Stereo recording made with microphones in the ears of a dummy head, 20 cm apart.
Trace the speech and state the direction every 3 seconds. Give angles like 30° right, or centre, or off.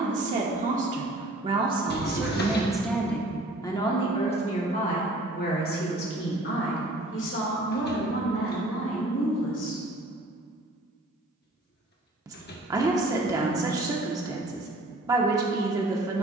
20° right, 30° left, 60° left, 60° left, 20° right, 20° right.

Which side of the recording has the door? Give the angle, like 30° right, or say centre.
50° left.